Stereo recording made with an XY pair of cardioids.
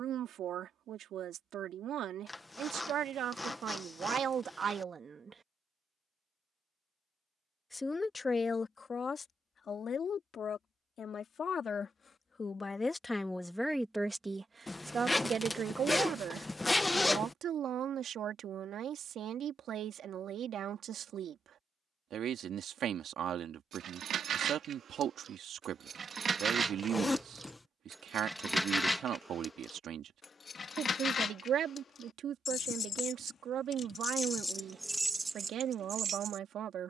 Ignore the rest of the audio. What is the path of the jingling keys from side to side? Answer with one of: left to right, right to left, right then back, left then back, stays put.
left then back.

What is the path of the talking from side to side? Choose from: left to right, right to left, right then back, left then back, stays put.
left then back.